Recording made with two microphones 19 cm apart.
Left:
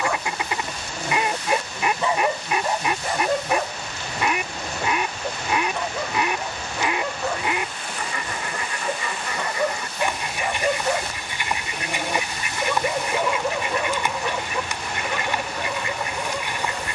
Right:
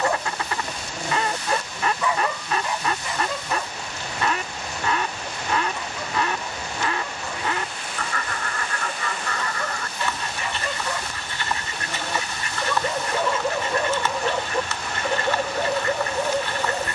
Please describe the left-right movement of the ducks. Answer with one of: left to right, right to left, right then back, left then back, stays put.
stays put.